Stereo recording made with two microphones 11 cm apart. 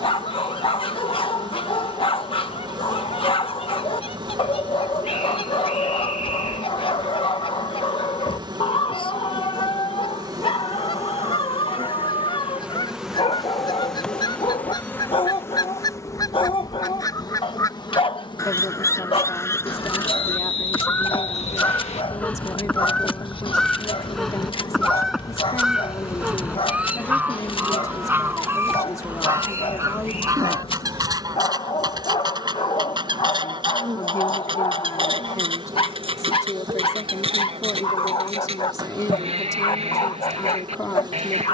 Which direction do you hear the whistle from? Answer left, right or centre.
left.